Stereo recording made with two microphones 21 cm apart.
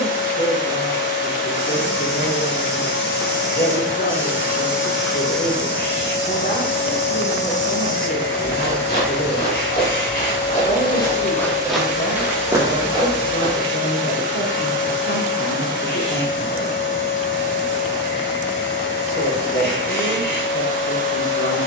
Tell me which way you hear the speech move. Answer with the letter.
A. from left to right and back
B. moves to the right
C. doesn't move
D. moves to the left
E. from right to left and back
C.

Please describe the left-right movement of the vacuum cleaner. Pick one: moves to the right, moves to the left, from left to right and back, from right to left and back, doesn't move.
doesn't move.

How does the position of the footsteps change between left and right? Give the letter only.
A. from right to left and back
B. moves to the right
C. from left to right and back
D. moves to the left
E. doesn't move
A.